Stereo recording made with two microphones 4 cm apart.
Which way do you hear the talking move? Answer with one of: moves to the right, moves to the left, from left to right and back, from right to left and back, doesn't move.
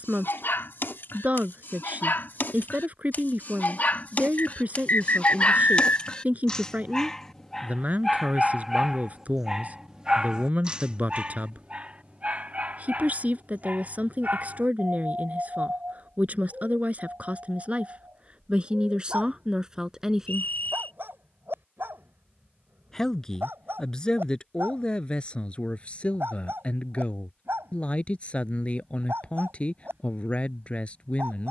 moves to the left.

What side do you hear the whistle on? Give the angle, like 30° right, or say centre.
50° left.